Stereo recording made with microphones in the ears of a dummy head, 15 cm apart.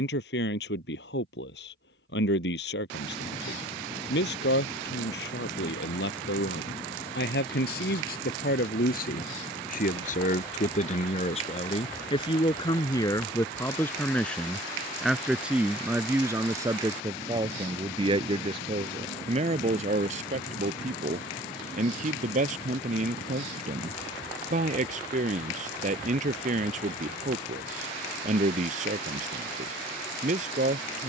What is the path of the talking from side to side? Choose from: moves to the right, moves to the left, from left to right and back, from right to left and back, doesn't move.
moves to the right.